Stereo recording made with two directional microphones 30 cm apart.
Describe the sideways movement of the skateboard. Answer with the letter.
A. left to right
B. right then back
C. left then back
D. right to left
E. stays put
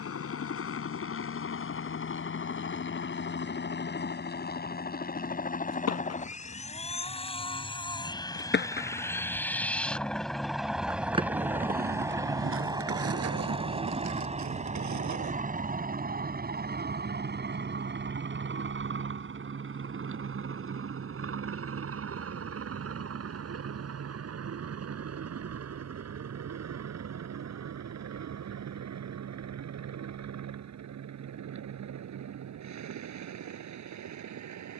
A.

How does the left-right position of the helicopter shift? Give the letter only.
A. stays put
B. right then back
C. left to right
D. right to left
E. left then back
C.